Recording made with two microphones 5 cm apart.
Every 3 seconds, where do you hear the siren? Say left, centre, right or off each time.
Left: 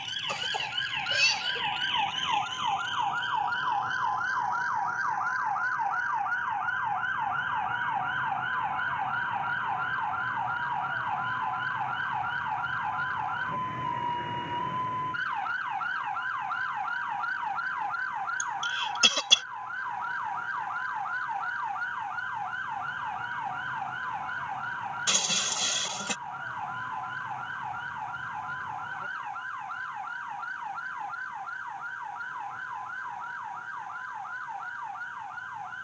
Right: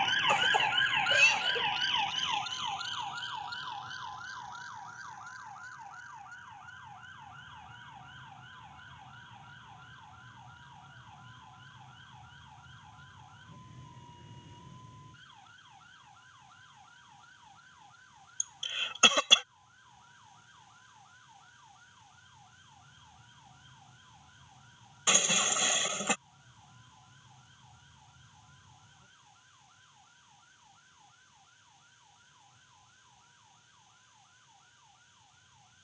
centre, left, left, left, left, left, left, left, left, left, left, left.